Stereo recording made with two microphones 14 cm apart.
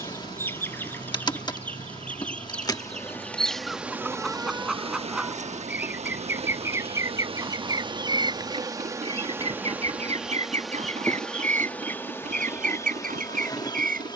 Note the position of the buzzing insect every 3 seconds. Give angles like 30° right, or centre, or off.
30° left, 30° right, 40° right, centre, 20° left.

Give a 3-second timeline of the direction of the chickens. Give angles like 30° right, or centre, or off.
10° left, centre, 20° right, 50° right, 70° right.